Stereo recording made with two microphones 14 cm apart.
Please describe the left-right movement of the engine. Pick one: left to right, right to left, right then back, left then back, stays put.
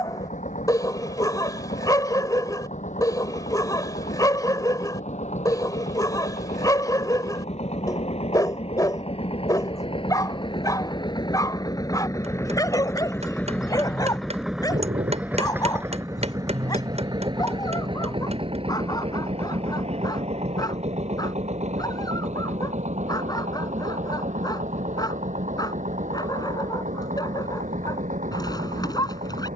left to right.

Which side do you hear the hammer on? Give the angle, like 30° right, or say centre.
60° right.